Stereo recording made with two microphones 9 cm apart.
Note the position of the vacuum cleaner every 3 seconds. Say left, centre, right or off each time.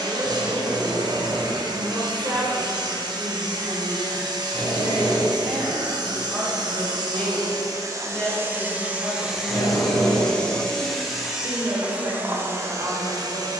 right, right, right, centre, right.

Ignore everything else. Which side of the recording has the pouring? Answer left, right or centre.
right.